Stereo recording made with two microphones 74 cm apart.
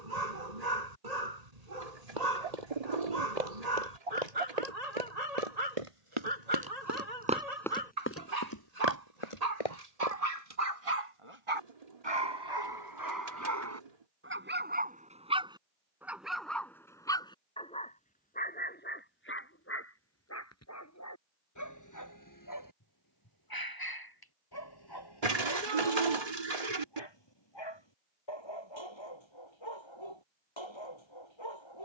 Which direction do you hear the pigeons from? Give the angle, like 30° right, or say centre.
60° right.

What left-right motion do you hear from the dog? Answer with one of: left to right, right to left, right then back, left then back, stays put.
right to left.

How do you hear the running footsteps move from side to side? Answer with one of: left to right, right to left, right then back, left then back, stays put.
right to left.